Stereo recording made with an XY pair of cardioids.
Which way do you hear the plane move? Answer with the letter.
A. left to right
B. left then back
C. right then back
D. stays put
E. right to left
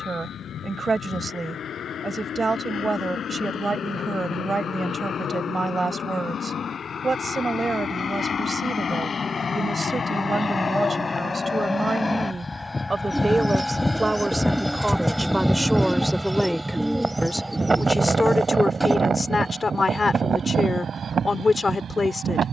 A.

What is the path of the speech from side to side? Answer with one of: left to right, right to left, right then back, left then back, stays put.
right to left.